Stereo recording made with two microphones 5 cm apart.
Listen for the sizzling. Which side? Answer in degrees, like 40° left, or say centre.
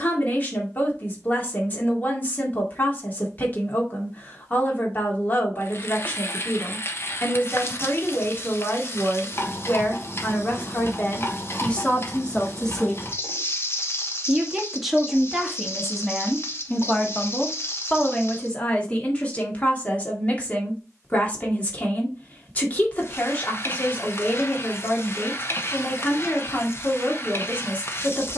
50° left.